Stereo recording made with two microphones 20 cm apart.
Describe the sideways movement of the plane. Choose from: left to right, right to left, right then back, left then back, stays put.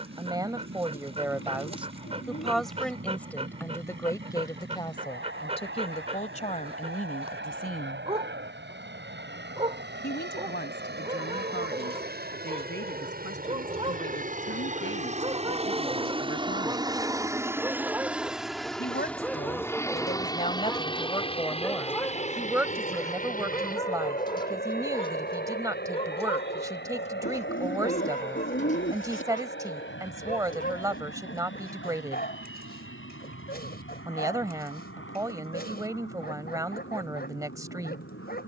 right to left.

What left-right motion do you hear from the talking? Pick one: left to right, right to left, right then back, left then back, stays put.
left then back.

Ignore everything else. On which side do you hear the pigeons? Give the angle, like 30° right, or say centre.
70° left.